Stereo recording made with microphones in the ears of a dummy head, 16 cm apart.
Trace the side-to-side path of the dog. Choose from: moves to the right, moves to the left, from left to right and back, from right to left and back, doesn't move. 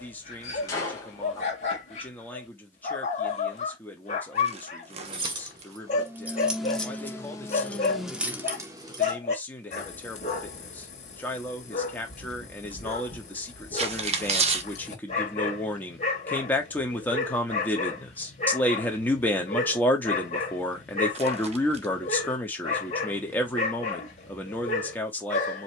doesn't move.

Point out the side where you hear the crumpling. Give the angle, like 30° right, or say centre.
40° right.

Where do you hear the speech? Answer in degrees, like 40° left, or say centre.
10° left.